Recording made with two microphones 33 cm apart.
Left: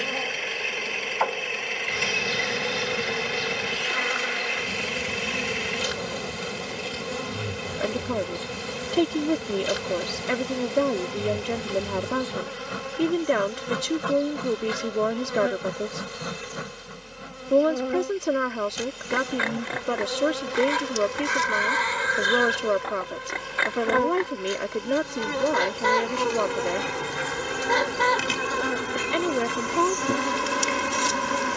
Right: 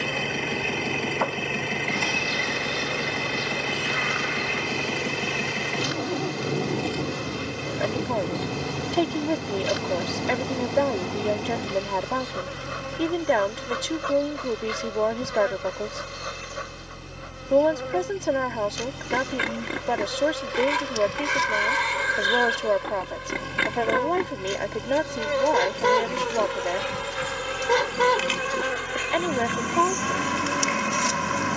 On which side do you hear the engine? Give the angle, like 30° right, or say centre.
60° right.